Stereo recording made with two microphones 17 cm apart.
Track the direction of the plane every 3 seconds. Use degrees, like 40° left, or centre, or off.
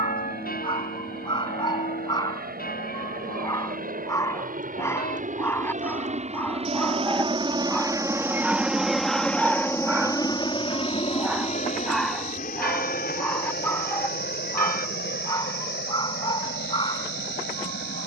70° right, 60° right, 30° right, 20° left, 50° left, 70° left.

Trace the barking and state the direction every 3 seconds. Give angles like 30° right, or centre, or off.
30° left, 20° left, 10° left, 10° right, 10° left, 30° left.